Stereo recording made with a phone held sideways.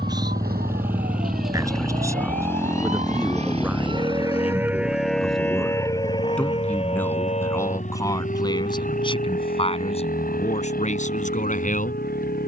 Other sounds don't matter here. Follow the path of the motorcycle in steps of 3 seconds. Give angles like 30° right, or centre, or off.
centre, 30° left, 50° left, 60° left.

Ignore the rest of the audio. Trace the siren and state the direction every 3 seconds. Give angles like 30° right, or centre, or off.
70° right, 10° right, 40° left, 60° left.